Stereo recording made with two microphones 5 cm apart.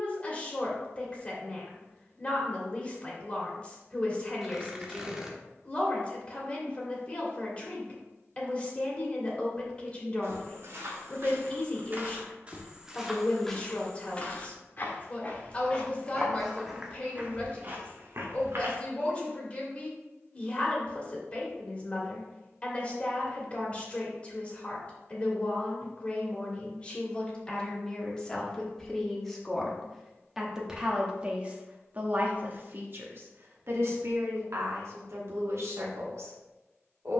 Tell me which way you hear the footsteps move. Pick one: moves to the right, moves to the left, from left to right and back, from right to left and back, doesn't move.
from right to left and back.